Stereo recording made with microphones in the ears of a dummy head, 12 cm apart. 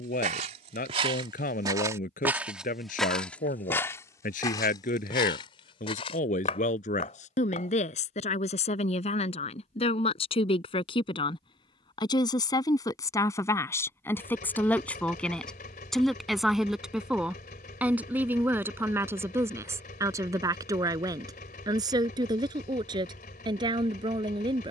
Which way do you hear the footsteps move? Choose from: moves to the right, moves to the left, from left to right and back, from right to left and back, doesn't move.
moves to the left.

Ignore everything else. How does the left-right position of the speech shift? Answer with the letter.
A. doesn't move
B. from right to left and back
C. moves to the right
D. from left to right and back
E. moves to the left
C.